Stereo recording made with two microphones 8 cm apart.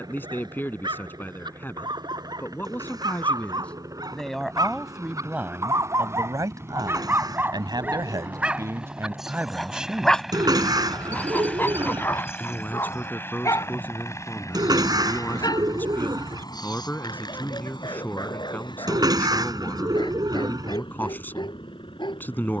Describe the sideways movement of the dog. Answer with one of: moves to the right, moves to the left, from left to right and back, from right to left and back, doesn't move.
moves to the left.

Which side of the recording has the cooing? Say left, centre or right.
right.